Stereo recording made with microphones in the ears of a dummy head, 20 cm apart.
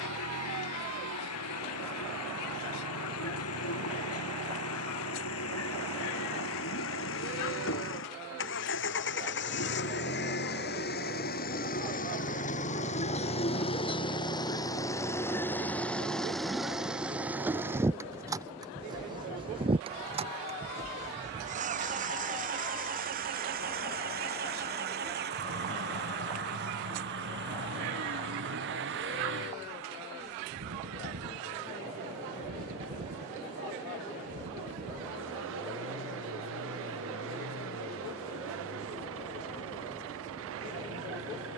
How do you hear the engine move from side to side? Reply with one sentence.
You can hear the engine go from the left side to the right.